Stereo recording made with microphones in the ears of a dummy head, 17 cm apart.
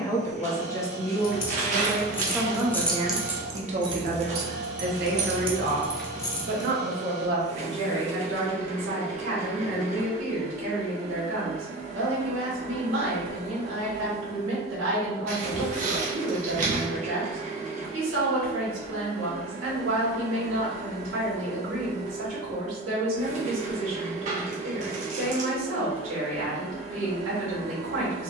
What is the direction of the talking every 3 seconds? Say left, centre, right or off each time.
centre, right, right, right, right, right, right, right, right, right.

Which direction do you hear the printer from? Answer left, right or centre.
right.